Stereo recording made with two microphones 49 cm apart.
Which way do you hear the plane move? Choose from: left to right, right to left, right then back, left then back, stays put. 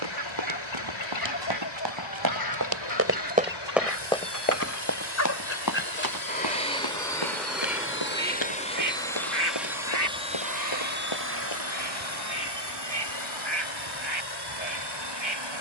left to right.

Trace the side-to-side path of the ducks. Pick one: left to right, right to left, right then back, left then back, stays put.
left to right.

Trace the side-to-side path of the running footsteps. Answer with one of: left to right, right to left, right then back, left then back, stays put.
right to left.